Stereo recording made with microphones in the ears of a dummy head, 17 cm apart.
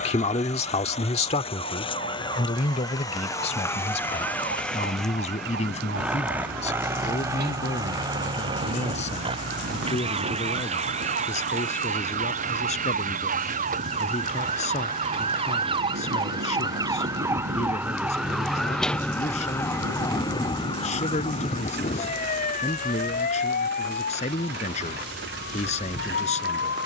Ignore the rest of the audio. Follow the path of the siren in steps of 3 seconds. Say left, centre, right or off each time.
right, right, right, right, right, right, centre, left, left.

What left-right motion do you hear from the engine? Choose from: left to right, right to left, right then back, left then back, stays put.
left to right.